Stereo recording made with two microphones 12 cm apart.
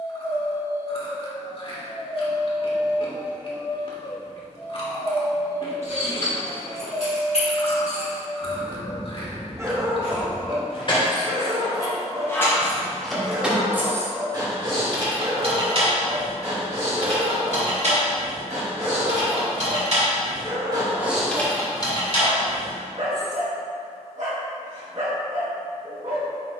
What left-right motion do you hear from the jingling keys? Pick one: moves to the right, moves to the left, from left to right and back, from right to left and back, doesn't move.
from left to right and back.